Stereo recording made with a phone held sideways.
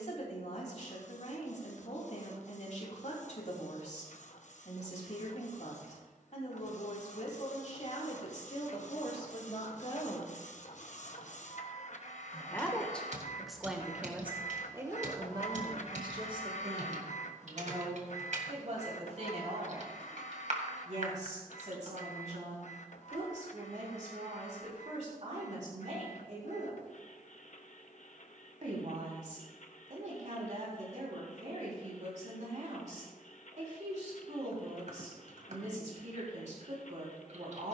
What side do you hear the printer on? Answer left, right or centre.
left.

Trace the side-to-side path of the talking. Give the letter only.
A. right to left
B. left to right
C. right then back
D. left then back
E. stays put
B.